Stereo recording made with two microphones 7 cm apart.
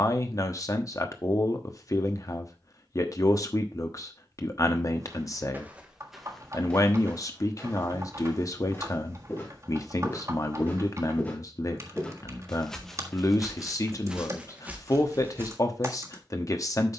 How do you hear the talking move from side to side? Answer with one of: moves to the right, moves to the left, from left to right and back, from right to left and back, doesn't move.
doesn't move.